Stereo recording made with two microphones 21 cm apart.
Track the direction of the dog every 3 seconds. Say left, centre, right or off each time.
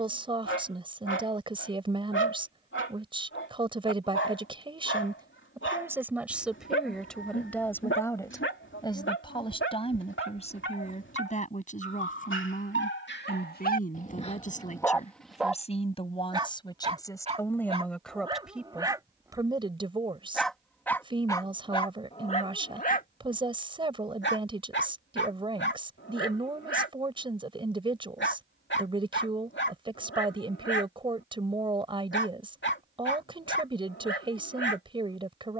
left, left, left, left, left, right, centre, left, left, left, left, left.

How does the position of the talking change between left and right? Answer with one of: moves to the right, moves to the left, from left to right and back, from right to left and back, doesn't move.
from right to left and back.